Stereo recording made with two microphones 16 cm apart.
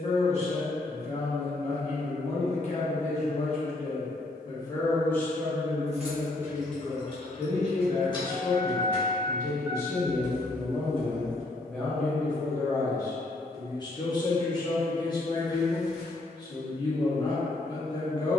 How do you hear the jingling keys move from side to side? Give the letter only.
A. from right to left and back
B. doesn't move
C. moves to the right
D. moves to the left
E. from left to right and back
A.